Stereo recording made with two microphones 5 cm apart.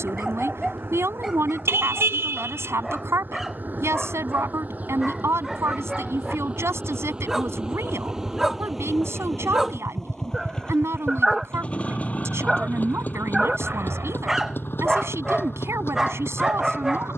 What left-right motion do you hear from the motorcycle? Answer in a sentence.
You can hear the motorcycle go from the right side to the left.